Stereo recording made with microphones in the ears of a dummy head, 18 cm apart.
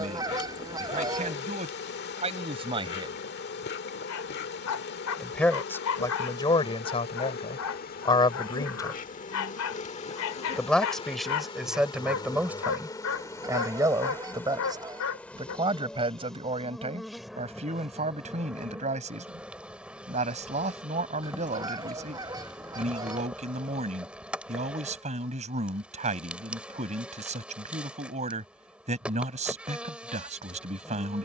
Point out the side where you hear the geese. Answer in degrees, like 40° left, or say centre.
20° right.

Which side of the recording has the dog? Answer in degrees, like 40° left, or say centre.
80° left.